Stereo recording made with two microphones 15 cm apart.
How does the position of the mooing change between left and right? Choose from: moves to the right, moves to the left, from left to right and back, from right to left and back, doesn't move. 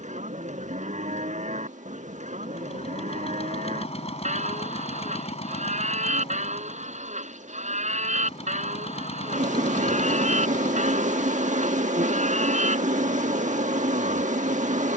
doesn't move.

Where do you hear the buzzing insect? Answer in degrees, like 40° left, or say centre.
60° right.